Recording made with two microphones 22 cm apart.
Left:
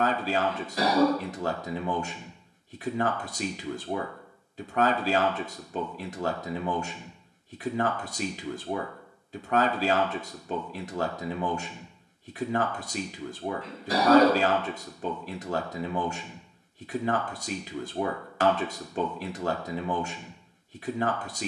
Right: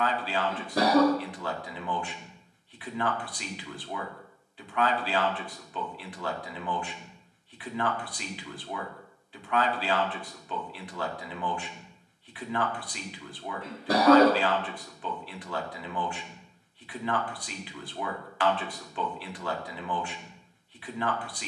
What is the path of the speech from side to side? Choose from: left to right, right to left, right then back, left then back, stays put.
stays put.